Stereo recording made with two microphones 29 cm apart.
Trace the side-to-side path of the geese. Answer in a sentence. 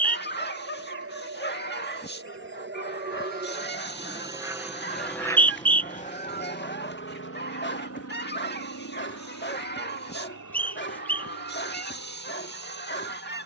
You can hear the geese stay put.